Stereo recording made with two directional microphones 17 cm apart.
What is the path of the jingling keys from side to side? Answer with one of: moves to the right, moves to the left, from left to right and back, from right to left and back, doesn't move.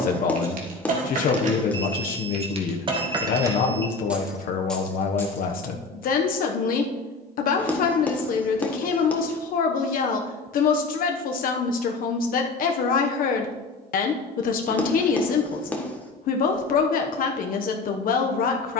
moves to the left.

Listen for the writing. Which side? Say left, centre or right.
centre.